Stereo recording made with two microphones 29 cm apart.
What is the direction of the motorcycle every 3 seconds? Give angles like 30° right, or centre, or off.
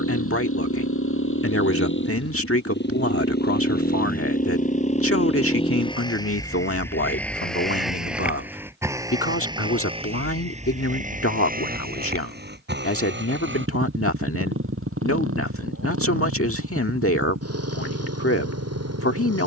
40° left, 30° left, centre, 20° right, 40° right, 50° right, 60° right.